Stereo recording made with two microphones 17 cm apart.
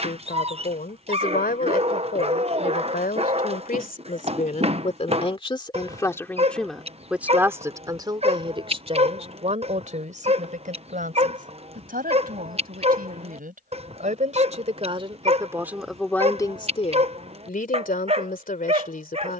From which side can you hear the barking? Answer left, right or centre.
right.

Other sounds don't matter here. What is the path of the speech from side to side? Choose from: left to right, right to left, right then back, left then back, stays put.
right then back.